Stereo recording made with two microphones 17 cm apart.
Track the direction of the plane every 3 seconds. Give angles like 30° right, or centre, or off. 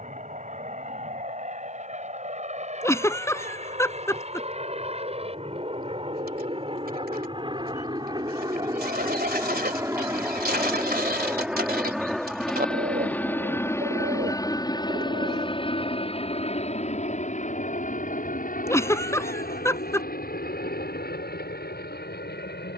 50° right, 40° right, 30° right, 10° right, 10° left, 40° left, 60° left, 60° left.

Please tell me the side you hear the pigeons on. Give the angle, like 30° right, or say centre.
70° right.